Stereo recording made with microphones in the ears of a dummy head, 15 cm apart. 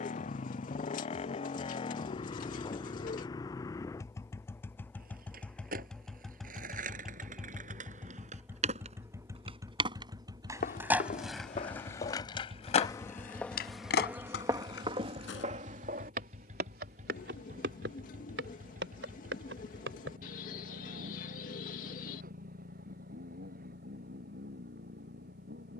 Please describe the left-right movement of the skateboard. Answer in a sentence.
In this clip you hear the skateboard travel towards the left.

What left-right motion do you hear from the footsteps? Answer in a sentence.
You can hear the footsteps move from left to right.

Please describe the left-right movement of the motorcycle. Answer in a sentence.
In this clip you hear the motorcycle move to the right.